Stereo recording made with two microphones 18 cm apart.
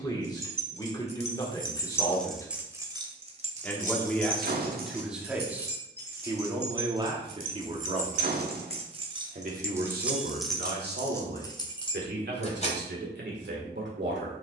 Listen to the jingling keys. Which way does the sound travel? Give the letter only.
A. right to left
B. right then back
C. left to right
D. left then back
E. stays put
B.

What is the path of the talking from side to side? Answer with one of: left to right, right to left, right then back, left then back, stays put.
left to right.